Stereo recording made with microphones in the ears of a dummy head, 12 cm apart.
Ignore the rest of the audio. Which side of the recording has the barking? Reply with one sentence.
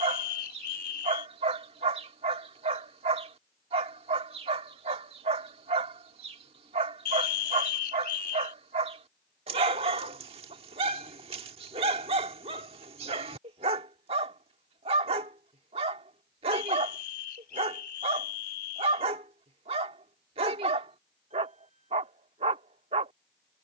You can hear the barking on the right.